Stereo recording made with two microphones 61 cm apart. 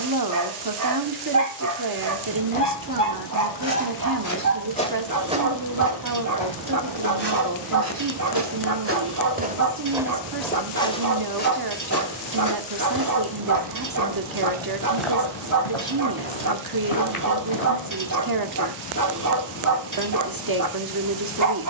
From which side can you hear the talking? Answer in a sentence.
You can hear the talking on the right.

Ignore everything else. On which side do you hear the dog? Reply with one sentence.
You can hear the dog on the right.